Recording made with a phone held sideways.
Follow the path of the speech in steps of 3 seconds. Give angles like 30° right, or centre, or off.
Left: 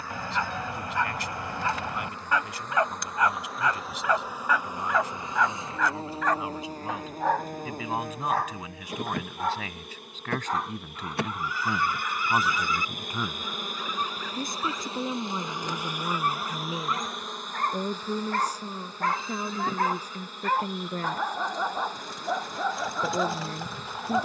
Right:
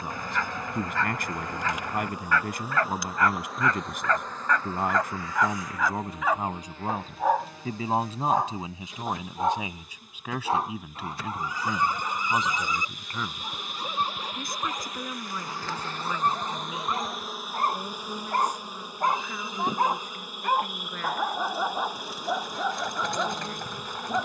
50° right, 50° right, 40° right, 10° right, 10° left, 30° left, 40° left, 40° left.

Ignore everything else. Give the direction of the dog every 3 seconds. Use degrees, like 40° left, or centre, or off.
20° left, 10° left, 10° right, 30° right, 40° right, 30° right, 20° right, centre.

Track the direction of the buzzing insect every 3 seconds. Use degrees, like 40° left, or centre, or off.
20° right, 10° left, 50° left, 70° left, 50° left, 10° left, 10° right, 10° right.